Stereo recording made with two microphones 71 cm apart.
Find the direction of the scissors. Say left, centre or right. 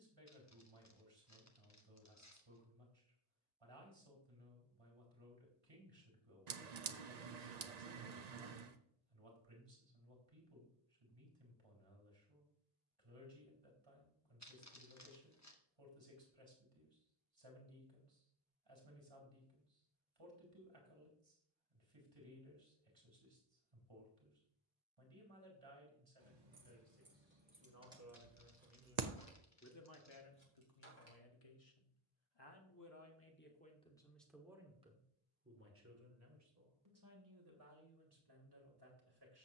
right.